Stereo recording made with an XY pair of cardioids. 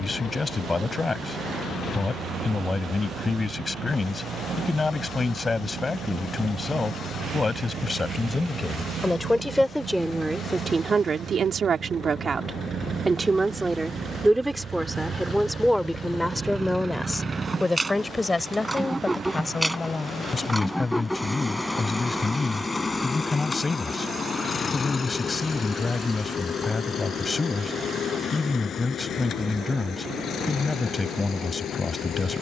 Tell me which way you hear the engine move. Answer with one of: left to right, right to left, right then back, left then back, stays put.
right to left.